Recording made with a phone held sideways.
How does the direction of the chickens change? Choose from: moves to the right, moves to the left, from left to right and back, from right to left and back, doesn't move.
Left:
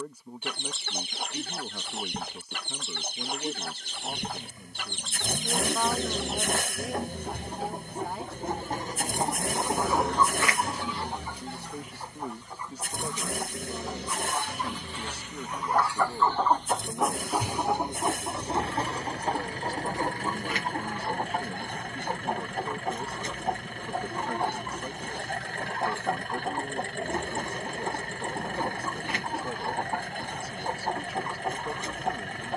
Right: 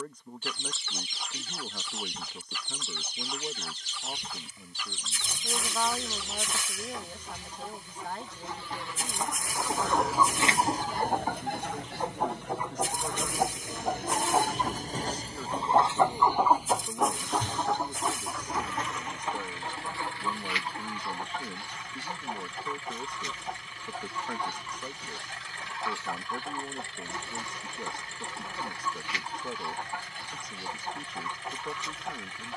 from left to right and back.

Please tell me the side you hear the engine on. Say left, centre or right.
left.